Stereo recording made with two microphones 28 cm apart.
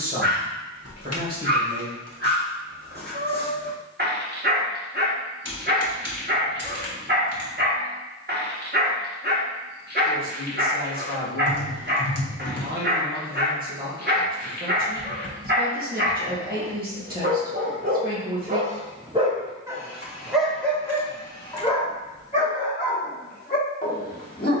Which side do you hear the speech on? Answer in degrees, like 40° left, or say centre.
30° right.